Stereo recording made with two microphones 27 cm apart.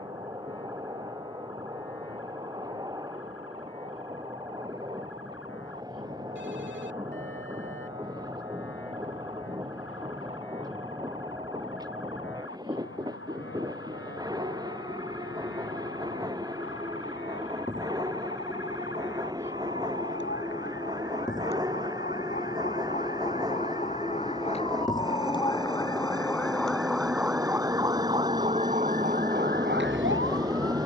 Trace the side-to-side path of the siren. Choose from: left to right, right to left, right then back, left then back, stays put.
left to right.